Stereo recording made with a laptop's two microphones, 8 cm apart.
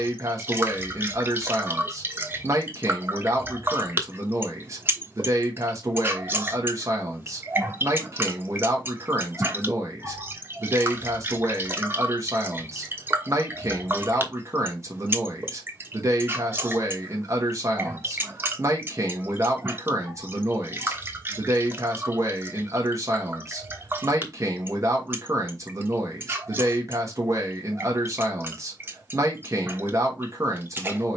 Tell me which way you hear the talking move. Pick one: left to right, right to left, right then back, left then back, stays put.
stays put.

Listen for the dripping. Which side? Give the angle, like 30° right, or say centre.
30° right.